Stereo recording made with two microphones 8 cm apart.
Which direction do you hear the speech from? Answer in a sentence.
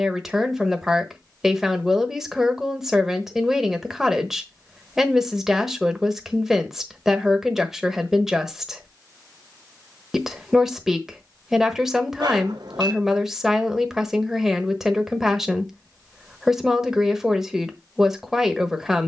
You can hear the speech in the centre.